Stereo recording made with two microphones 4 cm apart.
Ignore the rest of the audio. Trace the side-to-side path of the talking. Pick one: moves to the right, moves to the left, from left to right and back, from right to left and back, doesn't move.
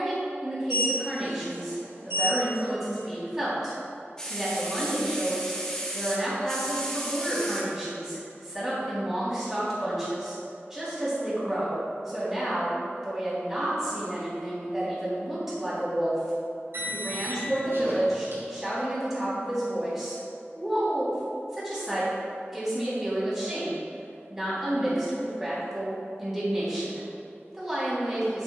doesn't move.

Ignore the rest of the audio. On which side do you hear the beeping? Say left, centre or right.
right.